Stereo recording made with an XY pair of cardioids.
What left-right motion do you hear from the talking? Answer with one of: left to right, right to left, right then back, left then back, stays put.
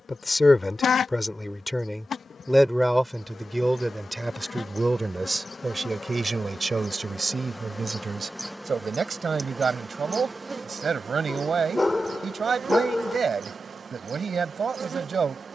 left to right.